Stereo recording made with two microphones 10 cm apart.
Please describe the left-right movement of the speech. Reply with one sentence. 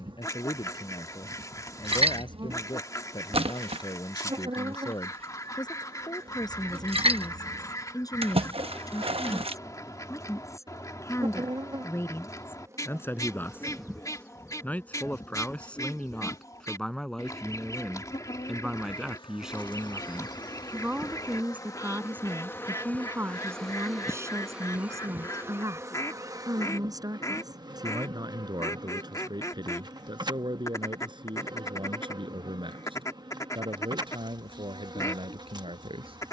In this clip you hear the speech travel towards the right.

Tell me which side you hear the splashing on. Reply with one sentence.
In this clip you hear the splashing on the right.